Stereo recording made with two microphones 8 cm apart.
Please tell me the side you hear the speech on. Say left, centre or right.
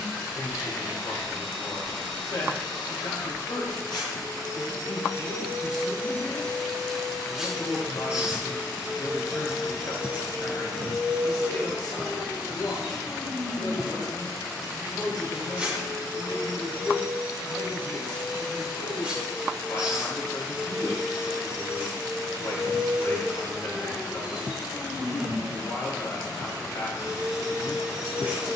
left.